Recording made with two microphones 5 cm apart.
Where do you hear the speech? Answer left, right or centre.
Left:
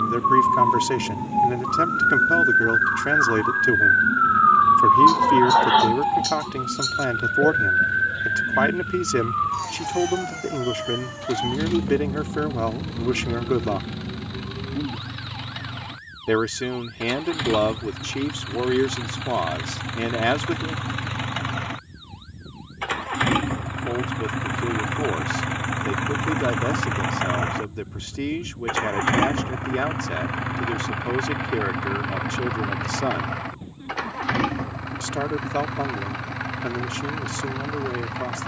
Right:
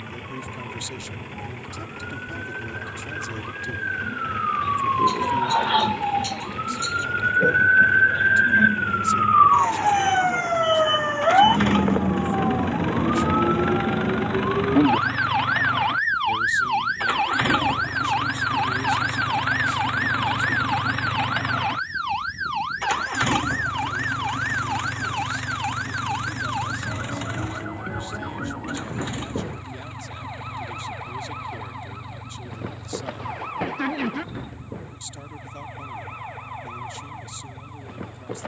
left.